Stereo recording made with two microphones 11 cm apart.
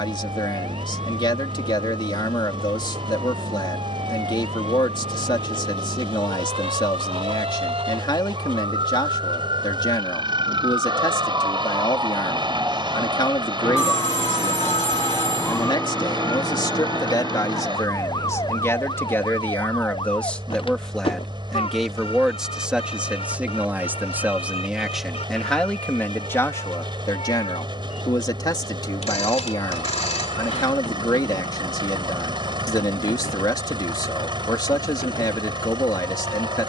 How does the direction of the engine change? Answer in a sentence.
You can hear the engine stay in one place.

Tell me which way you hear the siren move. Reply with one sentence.
You can hear the siren travel towards the left.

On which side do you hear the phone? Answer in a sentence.
In this clip you hear the phone on the left.